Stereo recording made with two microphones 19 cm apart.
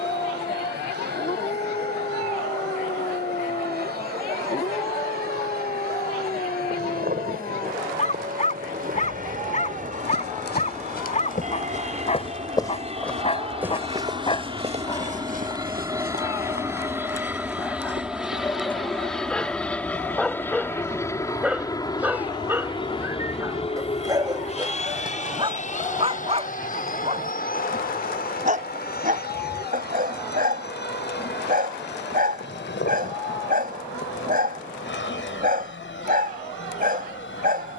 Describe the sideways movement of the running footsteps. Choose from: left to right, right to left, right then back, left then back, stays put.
left to right.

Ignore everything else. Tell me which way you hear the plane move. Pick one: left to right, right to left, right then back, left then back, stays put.
right to left.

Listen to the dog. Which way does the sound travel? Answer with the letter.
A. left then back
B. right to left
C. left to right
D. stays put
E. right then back
C.